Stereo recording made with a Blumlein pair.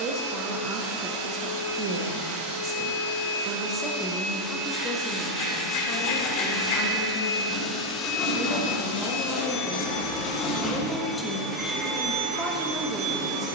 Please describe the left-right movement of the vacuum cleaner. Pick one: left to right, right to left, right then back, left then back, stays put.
left then back.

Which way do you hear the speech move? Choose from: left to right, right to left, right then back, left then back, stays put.
left then back.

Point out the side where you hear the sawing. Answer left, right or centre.
left.